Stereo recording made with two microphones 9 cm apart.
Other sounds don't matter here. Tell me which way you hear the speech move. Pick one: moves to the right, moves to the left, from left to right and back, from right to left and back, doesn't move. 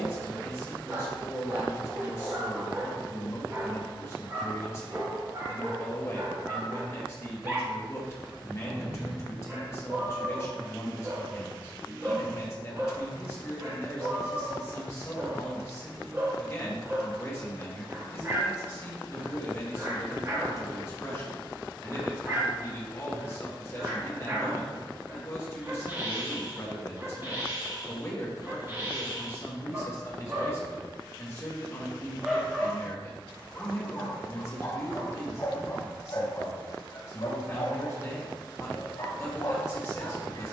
doesn't move.